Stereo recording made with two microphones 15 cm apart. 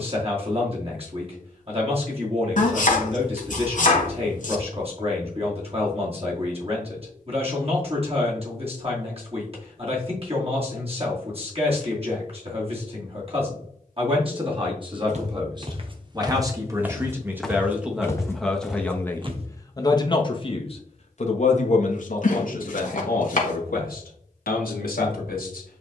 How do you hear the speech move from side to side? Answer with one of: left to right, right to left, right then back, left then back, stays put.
right to left.